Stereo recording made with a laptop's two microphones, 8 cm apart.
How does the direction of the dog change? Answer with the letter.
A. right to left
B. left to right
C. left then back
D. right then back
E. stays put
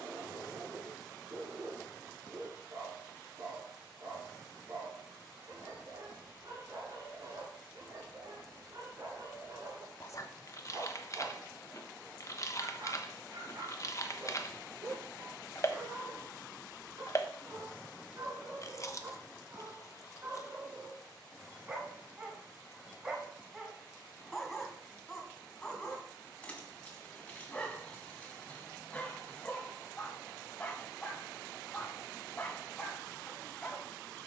A.